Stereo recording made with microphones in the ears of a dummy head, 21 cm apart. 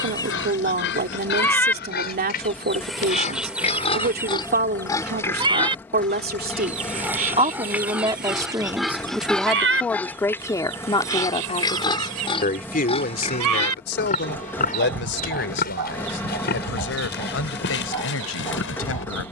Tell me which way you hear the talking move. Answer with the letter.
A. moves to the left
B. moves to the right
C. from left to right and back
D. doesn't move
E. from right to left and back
A.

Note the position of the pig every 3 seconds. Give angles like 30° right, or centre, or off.
40° left, 20° left, centre, 10° left, 30° left, 40° left, 50° left.